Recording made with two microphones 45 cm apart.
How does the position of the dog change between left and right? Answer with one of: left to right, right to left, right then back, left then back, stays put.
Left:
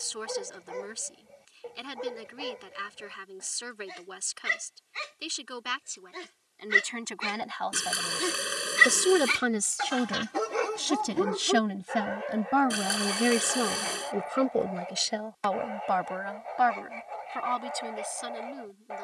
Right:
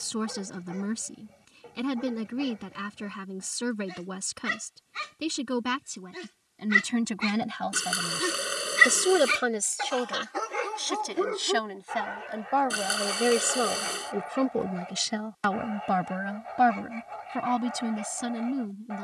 left then back.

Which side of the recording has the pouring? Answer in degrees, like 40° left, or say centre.
centre.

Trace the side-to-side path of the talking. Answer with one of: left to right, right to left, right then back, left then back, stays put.
left then back.